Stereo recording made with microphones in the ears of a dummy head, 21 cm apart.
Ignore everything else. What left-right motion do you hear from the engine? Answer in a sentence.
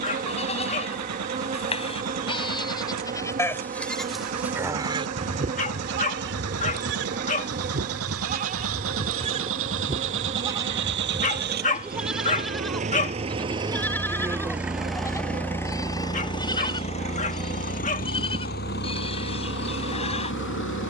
You can hear the engine travel towards the left.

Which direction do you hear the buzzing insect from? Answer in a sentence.
In this clip you hear the buzzing insect on the right.